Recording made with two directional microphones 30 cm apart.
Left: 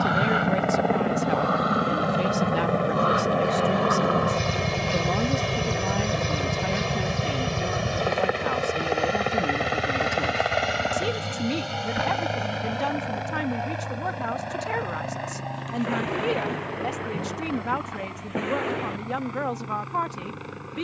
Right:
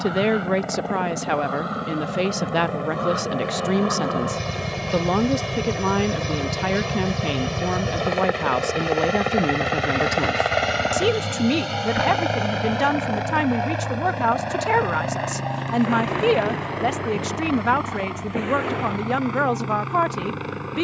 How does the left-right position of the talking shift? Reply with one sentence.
You can hear the talking stay in one place.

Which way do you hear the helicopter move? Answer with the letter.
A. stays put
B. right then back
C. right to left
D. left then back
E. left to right
E.